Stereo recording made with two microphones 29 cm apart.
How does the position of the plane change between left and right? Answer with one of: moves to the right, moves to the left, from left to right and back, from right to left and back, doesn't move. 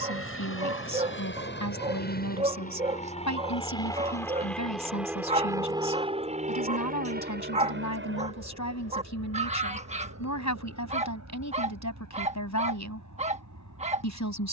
moves to the right.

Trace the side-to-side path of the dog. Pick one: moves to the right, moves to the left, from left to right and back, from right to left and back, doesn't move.
doesn't move.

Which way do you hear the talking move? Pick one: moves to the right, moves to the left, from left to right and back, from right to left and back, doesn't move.
doesn't move.